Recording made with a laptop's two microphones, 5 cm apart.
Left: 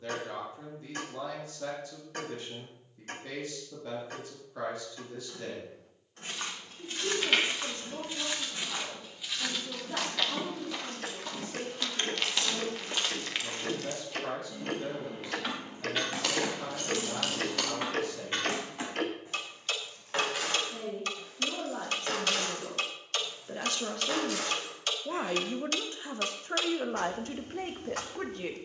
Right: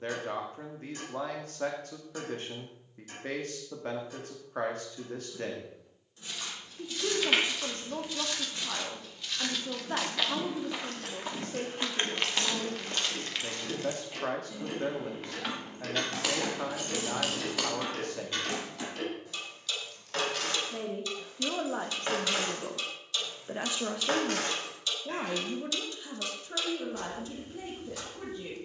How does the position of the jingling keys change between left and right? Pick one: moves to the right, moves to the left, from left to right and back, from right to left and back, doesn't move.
from right to left and back.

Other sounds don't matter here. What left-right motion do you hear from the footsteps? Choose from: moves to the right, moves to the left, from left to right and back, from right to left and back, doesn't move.
from left to right and back.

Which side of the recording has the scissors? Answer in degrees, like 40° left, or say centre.
centre.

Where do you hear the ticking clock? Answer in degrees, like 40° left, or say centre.
50° left.